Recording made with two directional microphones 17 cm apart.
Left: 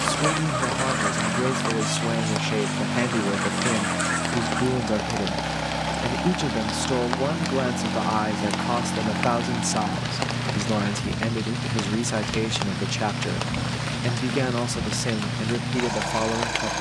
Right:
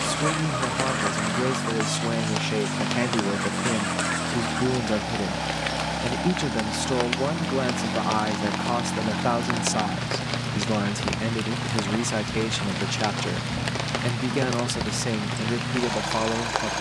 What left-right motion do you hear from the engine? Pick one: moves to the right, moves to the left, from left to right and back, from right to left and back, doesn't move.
doesn't move.